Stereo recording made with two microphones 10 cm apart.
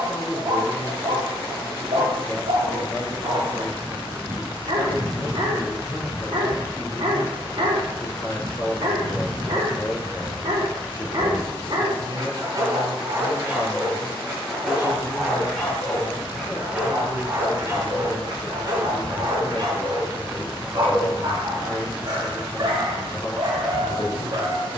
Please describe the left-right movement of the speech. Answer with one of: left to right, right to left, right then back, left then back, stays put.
stays put.